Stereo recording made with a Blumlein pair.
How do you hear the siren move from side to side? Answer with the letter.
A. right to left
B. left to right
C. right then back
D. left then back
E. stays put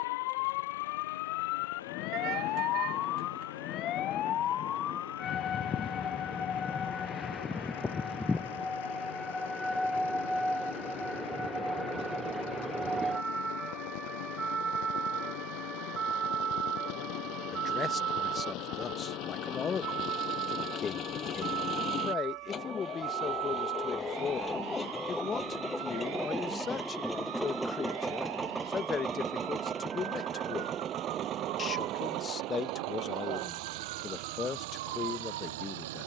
B.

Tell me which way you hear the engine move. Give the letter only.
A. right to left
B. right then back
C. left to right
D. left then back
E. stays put
C.